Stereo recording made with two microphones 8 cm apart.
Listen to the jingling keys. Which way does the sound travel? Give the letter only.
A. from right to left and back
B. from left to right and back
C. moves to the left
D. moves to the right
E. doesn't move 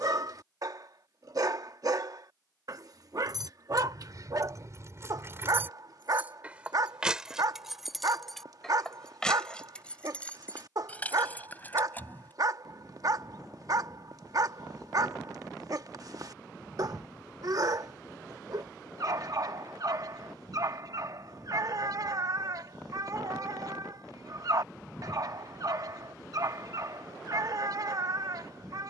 C.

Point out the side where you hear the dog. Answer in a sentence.
You can hear the dog on the right.